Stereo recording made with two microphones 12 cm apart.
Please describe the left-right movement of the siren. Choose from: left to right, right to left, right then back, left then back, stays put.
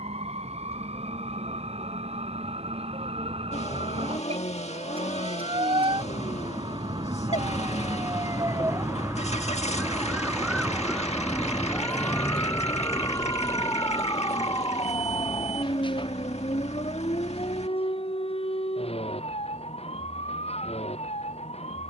right to left.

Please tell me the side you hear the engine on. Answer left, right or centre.
left.